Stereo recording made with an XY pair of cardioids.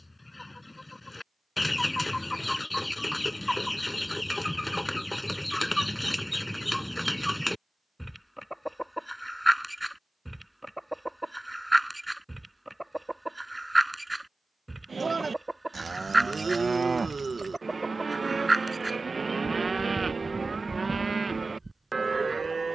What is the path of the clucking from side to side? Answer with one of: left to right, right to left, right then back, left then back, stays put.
left to right.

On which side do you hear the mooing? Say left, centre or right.
right.